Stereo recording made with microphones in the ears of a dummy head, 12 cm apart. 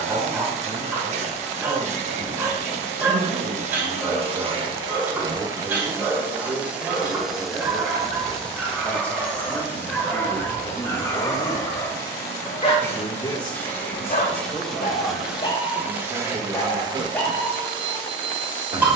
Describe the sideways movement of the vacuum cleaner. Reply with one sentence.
In this clip you hear the vacuum cleaner move from right to left and back again.